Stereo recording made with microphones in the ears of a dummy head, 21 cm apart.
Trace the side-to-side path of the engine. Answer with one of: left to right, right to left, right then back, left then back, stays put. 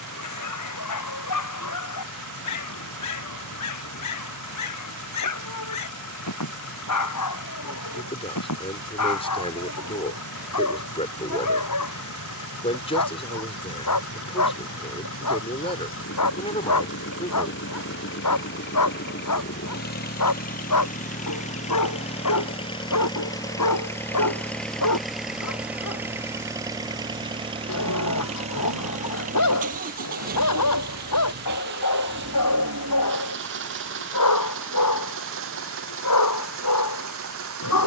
left to right.